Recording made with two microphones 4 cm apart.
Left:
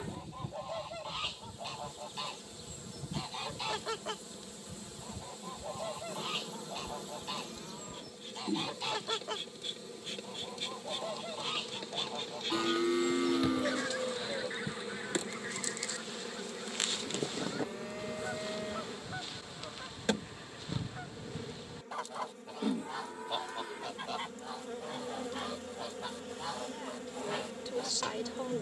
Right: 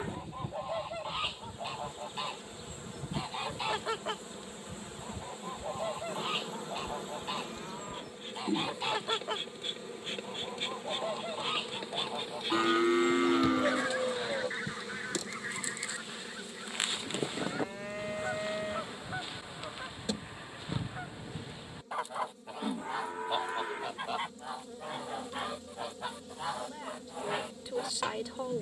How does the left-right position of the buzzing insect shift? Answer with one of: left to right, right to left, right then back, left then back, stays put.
right to left.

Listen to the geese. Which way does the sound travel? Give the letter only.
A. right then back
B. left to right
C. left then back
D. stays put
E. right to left
D.